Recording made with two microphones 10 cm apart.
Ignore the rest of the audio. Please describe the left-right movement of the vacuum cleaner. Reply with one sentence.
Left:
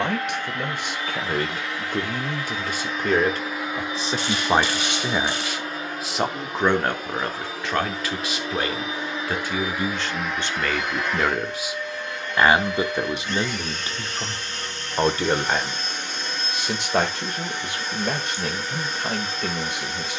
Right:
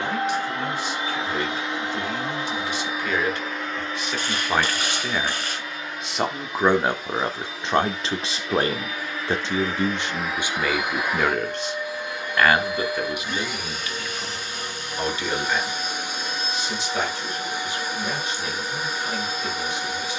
In this clip you hear the vacuum cleaner move from right to left and back again.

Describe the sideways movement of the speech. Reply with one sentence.
In this clip you hear the speech go right and come back.